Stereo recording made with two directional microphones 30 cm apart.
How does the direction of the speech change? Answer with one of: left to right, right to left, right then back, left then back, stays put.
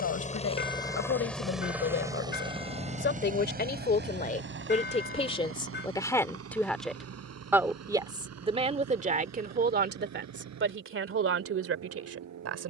left to right.